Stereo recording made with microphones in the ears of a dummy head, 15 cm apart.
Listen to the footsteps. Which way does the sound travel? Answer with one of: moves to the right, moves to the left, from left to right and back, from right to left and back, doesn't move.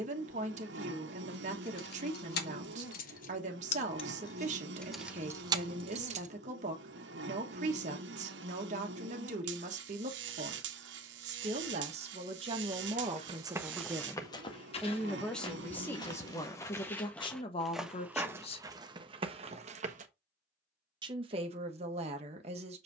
from right to left and back.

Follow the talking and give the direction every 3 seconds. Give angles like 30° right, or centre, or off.
40° right, 40° right, 40° right, 40° right, 20° right, 20° left, 40° left, 40° right.